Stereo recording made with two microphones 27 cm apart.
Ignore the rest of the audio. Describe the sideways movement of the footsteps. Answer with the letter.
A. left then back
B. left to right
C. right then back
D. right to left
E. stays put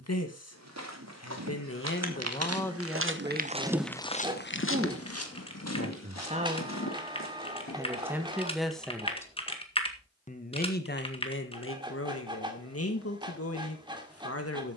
D.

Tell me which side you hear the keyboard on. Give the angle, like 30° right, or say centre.
20° left.